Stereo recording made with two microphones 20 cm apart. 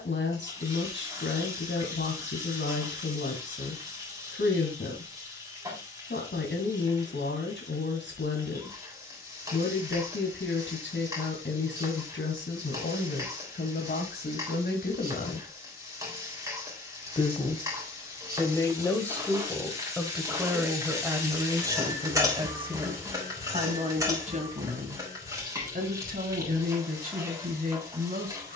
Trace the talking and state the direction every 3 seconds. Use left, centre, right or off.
left, left, left, left, left, left, centre, right, right, right.